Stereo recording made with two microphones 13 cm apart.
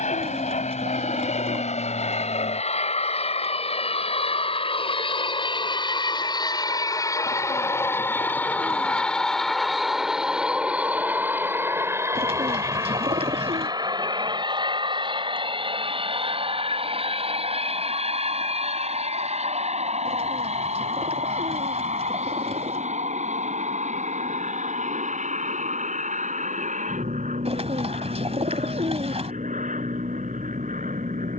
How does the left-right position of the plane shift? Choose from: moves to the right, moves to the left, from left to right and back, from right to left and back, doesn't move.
moves to the right.